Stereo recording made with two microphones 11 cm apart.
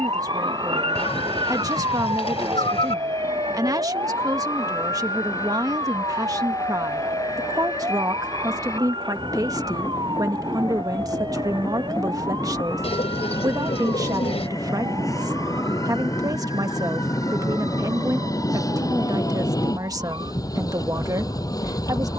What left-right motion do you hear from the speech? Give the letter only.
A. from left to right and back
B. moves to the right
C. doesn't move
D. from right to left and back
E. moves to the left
C.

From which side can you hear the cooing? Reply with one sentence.
In this clip you hear the cooing on the left.